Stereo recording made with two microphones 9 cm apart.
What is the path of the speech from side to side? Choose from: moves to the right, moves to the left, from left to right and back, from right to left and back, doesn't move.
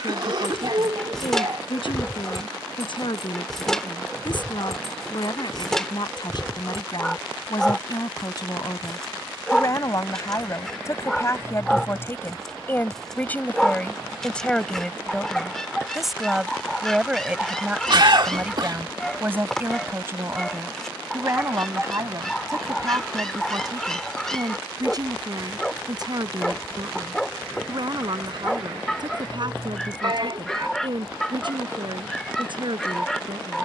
moves to the right.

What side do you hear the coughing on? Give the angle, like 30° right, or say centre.
60° right.